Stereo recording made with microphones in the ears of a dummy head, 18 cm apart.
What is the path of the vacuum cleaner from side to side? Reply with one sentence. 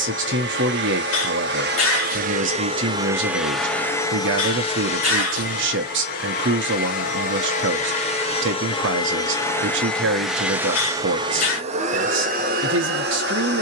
In this clip you hear the vacuum cleaner move from right to left and back again.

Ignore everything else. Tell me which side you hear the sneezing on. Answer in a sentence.
In this clip you hear the sneezing on the left.